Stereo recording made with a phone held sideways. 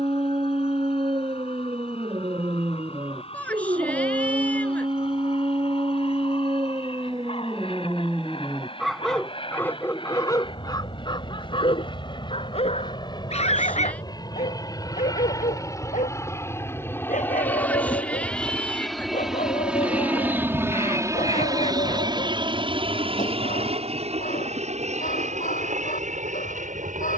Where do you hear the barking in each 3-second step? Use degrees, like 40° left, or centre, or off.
40° right, 40° right, 20° right, 20° left, 50° left, 70° left, 70° left, 80° left, 80° left.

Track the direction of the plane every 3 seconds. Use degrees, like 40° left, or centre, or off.
50° left, 50° left, 50° left, 40° left, 40° left, 20° left, centre, 40° right, 60° right.